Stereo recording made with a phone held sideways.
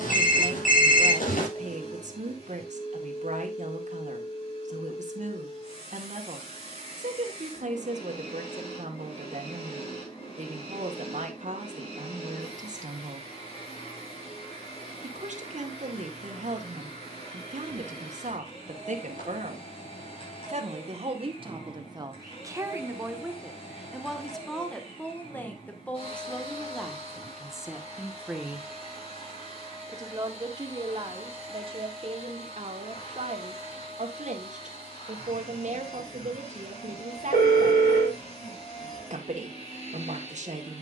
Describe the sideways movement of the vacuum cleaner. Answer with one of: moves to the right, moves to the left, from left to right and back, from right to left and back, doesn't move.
doesn't move.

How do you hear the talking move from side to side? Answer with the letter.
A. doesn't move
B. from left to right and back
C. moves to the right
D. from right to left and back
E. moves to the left
D.